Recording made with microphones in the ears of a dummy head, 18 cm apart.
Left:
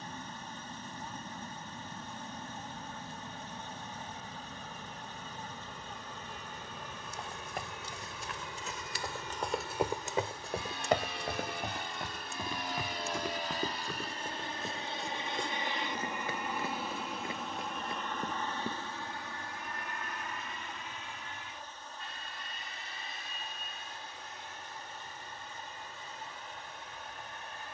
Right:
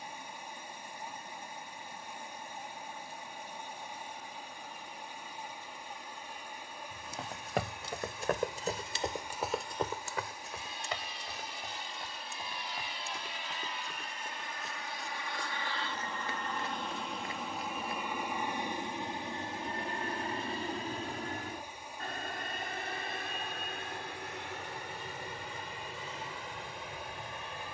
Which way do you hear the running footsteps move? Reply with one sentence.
You can hear the running footsteps go from the right side to the left.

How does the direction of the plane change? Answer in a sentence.
You can hear the plane move from left to right.